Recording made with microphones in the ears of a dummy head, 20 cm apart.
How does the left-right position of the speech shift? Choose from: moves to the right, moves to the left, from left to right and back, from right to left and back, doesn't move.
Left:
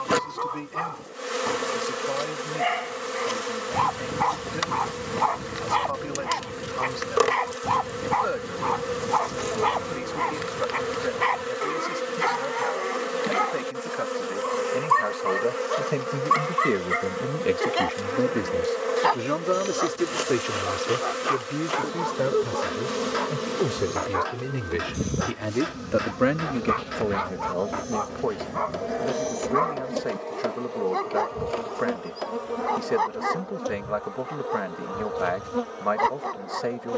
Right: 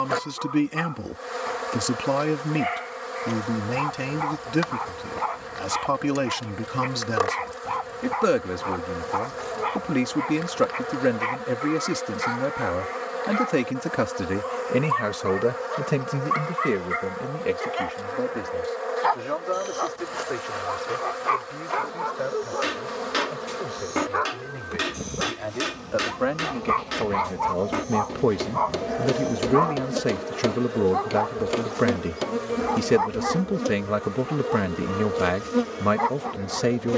from right to left and back.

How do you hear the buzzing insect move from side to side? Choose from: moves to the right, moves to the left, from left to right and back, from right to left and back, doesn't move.
moves to the right.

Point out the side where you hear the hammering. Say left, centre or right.
right.